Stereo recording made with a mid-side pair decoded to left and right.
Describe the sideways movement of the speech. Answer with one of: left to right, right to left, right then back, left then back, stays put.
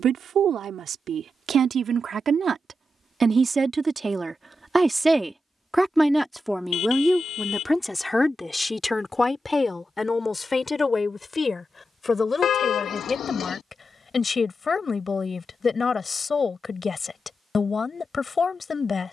right to left.